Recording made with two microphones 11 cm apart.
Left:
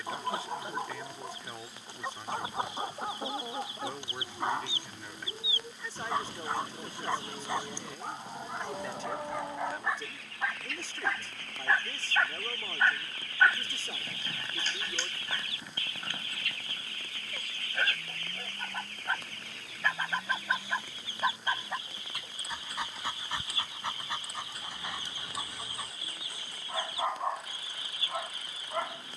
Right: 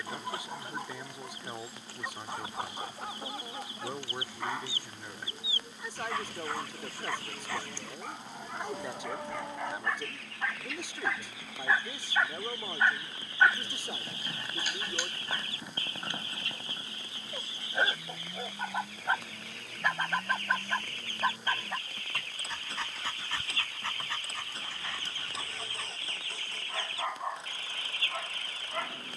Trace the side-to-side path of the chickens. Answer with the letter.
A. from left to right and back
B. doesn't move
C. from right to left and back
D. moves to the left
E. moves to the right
A.